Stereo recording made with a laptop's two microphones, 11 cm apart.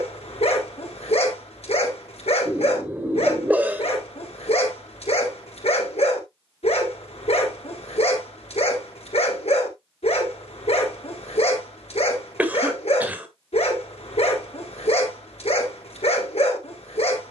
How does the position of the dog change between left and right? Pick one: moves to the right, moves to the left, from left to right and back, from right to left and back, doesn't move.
doesn't move.